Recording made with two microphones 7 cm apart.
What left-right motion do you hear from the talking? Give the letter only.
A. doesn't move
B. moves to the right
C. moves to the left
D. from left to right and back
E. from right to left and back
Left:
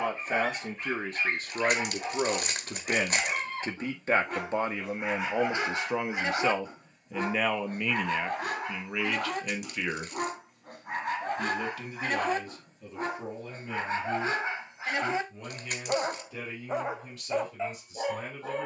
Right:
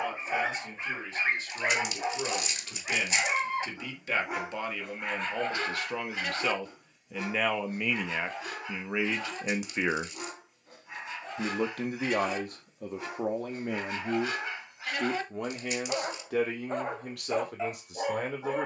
B.